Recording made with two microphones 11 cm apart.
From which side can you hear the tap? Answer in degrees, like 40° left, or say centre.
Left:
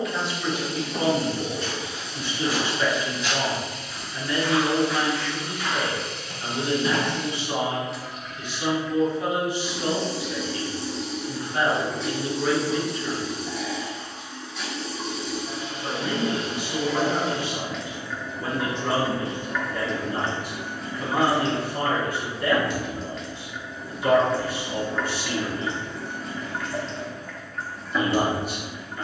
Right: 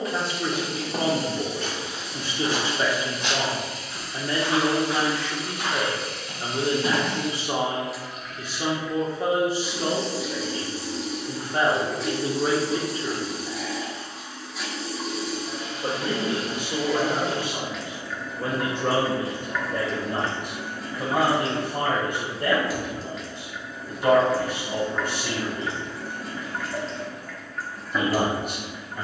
centre.